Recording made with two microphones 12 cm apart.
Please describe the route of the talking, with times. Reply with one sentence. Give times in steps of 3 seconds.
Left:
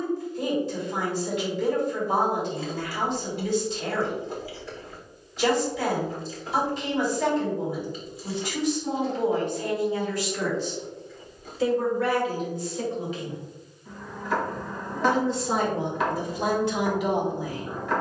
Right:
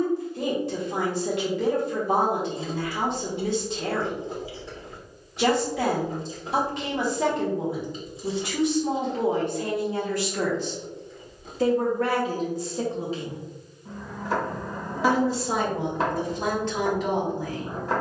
In this clip you hear the talking on the right from 0 s and in the centre from 15 s.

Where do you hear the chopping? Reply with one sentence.
In this clip you hear the chopping on the right.